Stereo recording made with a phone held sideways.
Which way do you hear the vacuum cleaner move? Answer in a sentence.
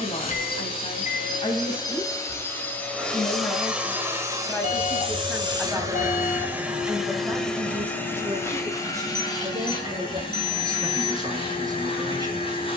You can hear the vacuum cleaner go right and come back.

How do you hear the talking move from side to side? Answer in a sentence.
You can hear the talking travel towards the right.